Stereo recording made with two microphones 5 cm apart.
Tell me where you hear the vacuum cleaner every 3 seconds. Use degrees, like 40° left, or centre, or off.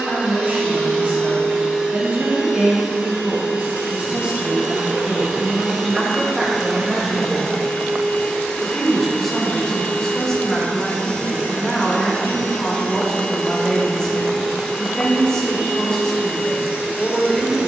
30° right, 20° right, centre, 30° left, 10° left, 20° right.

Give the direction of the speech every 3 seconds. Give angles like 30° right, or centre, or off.
40° right, 30° right, 10° right, 10° left, 10° left, 10° left.